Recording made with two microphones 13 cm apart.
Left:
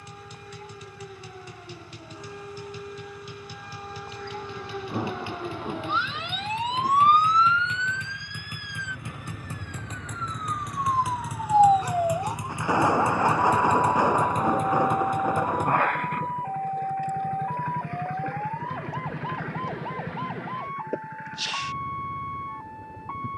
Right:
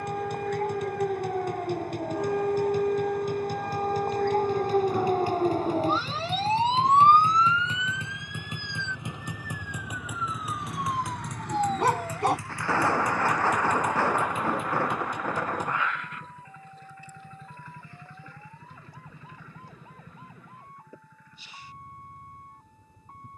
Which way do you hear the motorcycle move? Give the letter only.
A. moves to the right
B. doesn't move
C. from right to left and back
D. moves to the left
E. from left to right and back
D.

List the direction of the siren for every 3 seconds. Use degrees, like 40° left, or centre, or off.
70° right, 50° right, 10° right, 30° left, 50° left, 70° left, 70° left, 70° left.